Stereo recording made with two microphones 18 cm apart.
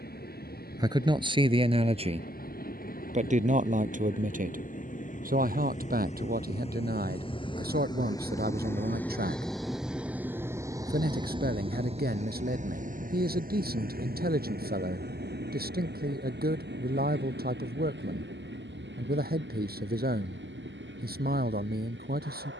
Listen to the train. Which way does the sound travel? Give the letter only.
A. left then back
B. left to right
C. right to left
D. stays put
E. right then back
B.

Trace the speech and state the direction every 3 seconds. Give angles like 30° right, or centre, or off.
30° right, 50° right, 60° right, 60° right, 60° right, 60° right, 60° right, 60° right.